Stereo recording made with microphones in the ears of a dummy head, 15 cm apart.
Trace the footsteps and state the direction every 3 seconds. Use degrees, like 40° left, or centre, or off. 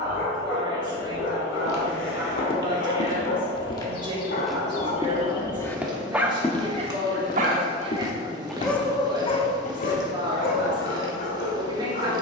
60° left, 10° left, 30° left, 60° left.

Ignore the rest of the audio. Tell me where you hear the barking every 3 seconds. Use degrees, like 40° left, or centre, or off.
70° left, 50° left, 20° right, 60° left.